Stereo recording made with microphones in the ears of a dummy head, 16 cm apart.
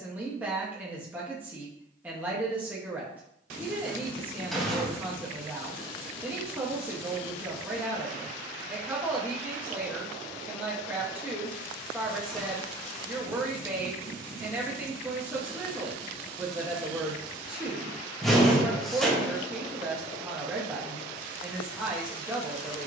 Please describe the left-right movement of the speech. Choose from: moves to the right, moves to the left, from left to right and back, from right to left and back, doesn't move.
doesn't move.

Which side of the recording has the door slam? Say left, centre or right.
centre.